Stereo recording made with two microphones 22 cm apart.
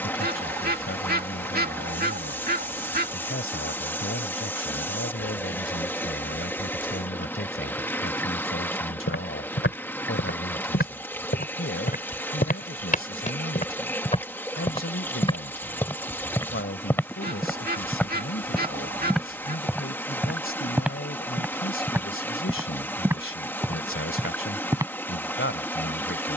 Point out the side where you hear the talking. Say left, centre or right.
left.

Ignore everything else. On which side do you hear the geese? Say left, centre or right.
right.